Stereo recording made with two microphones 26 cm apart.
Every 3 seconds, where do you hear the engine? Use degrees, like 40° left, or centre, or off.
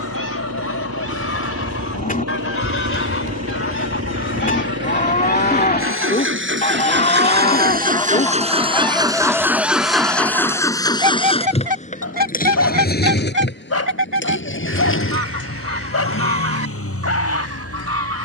70° right, 60° right, 40° right, 10° left, 40° left, 60° left.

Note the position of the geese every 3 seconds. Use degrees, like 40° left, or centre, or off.
60° left, 40° left, 20° left, 10° right, 40° right, 60° right.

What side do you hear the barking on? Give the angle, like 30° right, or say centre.
60° left.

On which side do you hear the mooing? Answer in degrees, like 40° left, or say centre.
30° left.